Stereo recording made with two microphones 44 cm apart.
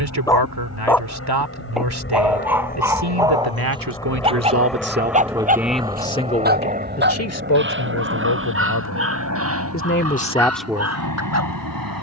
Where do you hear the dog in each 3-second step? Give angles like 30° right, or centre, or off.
centre, 10° right, 30° right, 30° right.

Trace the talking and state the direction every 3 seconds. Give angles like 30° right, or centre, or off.
60° right, 30° right, 40° left, 10° left.